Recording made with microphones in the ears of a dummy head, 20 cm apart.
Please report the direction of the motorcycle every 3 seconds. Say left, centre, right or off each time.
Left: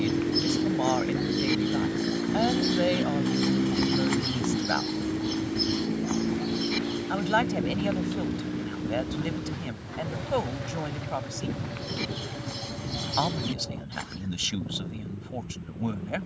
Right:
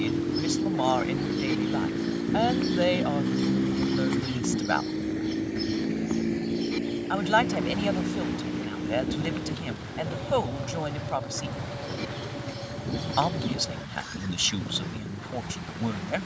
left, centre, right, right, right, right.